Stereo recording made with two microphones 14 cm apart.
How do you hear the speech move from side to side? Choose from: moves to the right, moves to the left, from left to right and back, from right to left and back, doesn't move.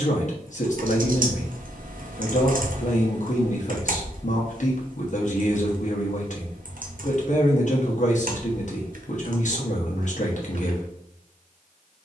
doesn't move.